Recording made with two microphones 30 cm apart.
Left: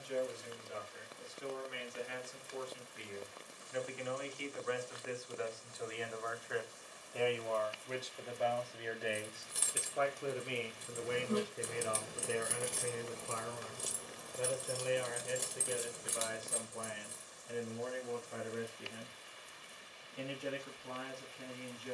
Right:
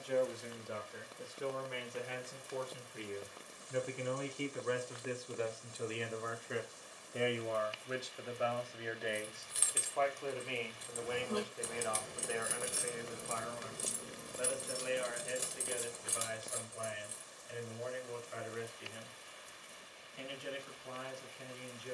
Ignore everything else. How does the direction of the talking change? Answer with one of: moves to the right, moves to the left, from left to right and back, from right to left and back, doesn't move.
moves to the left.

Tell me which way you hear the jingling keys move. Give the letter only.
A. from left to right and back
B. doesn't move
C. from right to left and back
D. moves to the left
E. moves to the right
A.